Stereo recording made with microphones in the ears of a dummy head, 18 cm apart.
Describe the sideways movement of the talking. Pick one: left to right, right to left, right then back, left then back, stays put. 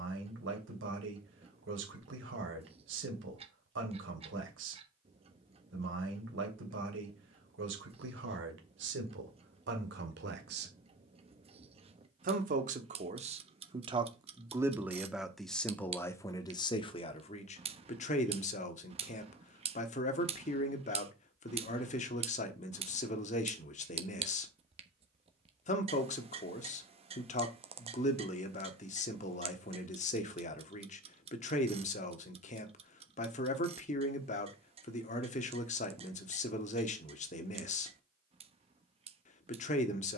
right to left.